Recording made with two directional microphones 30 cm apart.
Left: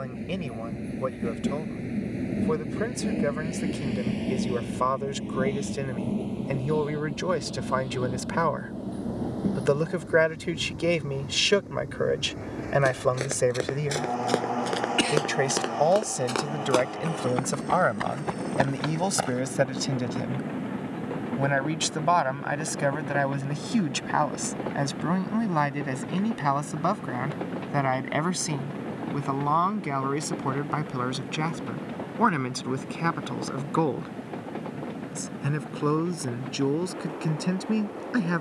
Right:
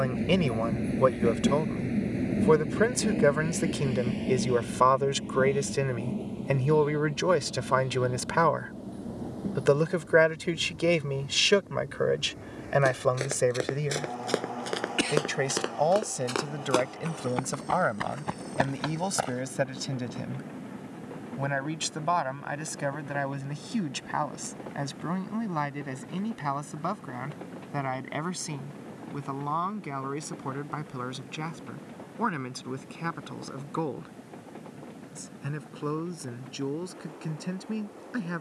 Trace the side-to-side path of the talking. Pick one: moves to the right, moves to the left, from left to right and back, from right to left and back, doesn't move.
moves to the left.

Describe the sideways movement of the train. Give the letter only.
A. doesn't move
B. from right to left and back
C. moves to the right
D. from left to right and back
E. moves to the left
E.